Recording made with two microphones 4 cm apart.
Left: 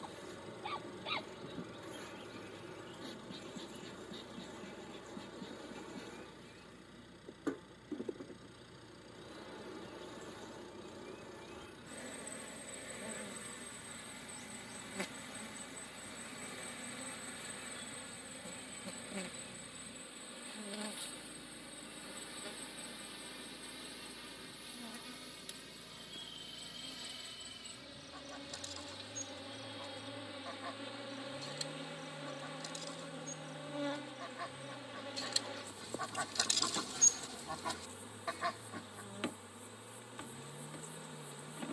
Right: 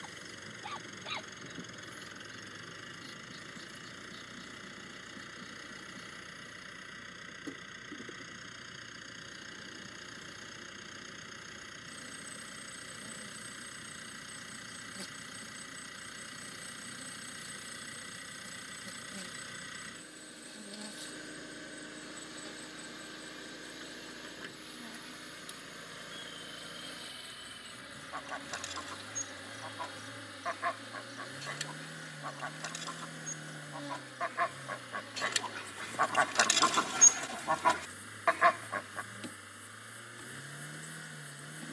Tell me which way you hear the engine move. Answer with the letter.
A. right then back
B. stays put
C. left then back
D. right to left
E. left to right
B.